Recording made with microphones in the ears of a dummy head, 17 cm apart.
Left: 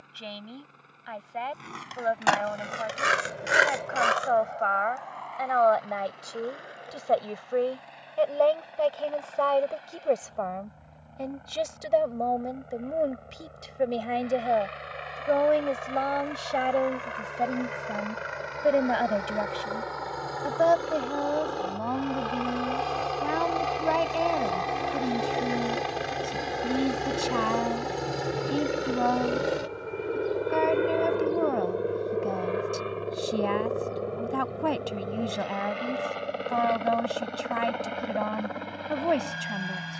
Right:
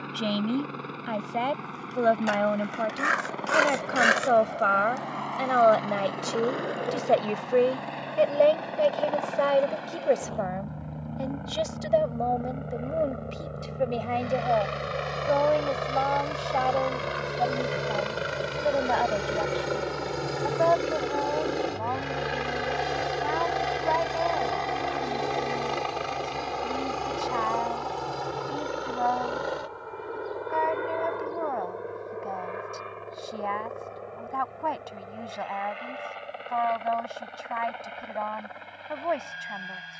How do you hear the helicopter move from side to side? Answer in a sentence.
In this clip you hear the helicopter go from the right side to the left.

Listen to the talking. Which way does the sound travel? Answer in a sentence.
In this clip you hear the talking move to the left.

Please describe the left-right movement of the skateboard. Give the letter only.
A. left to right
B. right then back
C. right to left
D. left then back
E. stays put
A.